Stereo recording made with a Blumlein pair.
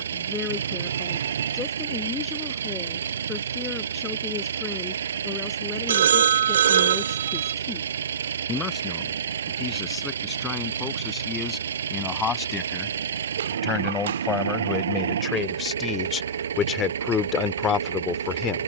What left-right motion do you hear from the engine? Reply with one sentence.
In this clip you hear the engine stay put.